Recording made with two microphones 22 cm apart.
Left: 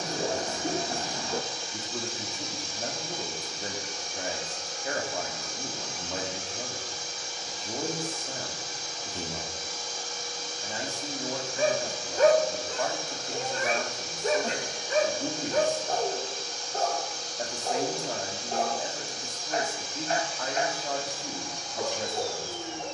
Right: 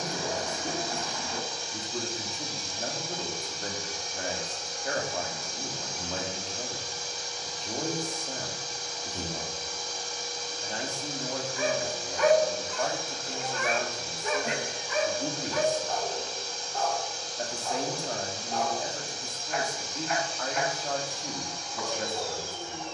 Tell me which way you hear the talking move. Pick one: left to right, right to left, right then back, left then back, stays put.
stays put.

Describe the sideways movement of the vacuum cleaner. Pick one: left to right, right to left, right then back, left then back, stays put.
stays put.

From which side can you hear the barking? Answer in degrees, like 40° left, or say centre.
40° left.